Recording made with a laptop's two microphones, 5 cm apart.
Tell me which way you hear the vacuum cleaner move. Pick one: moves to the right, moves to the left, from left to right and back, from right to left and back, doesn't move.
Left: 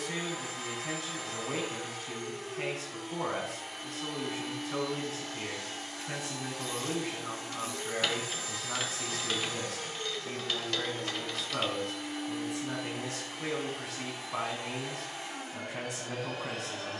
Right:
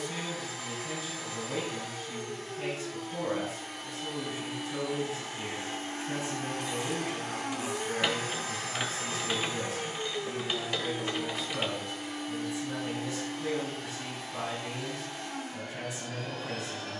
from left to right and back.